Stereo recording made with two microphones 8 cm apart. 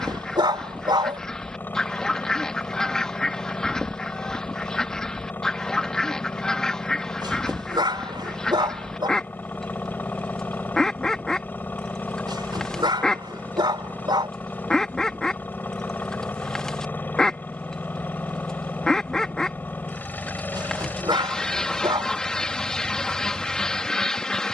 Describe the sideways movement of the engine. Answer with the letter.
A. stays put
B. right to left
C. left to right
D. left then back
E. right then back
A.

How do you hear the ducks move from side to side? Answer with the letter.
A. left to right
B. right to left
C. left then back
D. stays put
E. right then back
D.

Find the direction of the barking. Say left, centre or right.
right.